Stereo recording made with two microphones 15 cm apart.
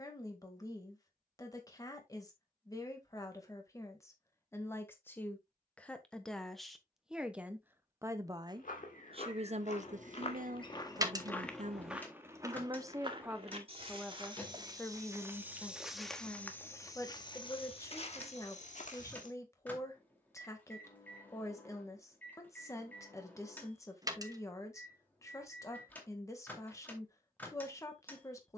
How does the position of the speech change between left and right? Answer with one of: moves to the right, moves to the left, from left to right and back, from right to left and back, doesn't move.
from left to right and back.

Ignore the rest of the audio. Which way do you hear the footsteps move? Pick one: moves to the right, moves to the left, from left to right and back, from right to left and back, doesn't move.
from left to right and back.